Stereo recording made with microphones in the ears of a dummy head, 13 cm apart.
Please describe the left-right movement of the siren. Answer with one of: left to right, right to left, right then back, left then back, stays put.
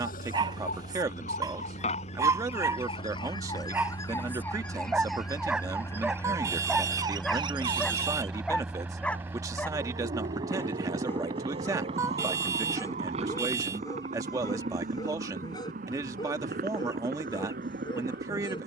left to right.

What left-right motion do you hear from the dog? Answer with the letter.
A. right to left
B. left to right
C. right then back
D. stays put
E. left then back
A.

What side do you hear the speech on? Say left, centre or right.
right.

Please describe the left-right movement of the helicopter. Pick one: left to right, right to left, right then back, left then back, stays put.
left to right.